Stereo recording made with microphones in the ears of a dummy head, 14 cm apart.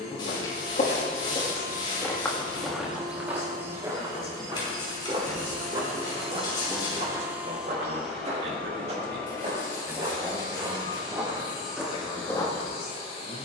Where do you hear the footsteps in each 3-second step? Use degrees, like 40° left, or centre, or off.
30° left, 20° right, 40° right, 30° right, 20° left.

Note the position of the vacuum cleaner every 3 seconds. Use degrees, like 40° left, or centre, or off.
30° left, 60° right, 10° right, 30° left, 40° left.